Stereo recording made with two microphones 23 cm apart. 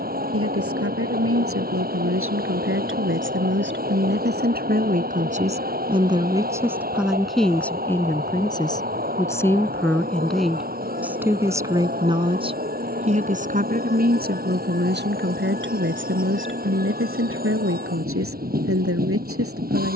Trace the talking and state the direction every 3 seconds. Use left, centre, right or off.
right, right, centre, centre, right, right, right.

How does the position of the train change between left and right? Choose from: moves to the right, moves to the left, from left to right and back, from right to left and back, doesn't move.
doesn't move.